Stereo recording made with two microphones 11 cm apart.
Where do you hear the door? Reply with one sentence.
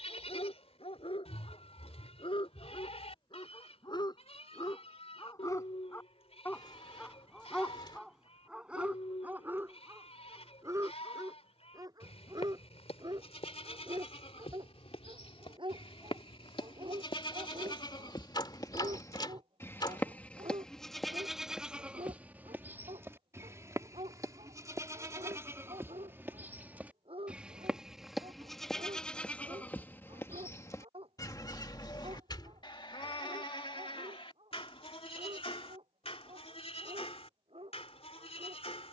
You can hear the door on the left.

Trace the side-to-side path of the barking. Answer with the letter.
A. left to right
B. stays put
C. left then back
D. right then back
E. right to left
A.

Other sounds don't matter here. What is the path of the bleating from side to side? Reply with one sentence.
You can hear the bleating move from left to right and back again.